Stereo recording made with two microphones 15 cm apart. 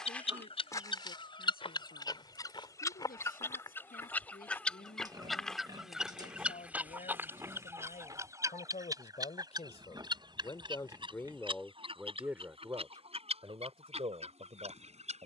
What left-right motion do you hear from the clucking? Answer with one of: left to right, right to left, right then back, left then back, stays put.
left to right.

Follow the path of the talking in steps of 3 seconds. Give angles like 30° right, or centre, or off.
80° left, 70° left, 60° left, 30° left, 30° right.